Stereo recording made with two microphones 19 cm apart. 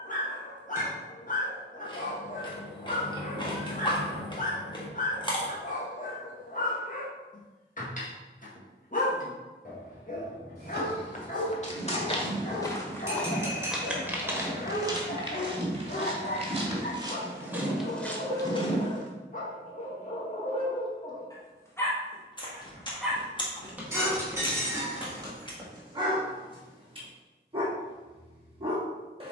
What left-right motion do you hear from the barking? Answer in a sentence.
You can hear the barking go from the left side to the right.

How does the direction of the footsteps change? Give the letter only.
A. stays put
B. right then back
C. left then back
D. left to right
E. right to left
B.